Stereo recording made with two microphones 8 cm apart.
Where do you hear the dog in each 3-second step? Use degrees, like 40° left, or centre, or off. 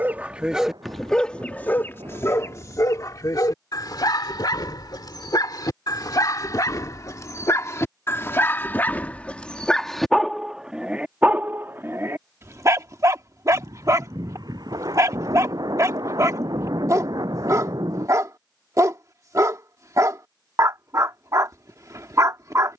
10° left, 50° left, 40° left, 10° right, 40° right, 40° right, 40° right, 40° right.